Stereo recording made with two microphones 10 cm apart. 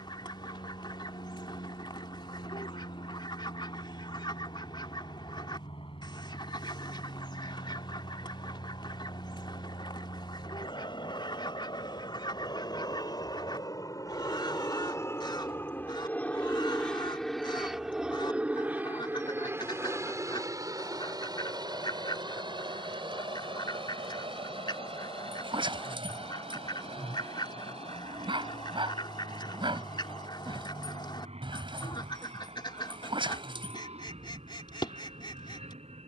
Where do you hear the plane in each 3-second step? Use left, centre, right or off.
left, left, left, left, left, centre, right, right, right, right, right, right.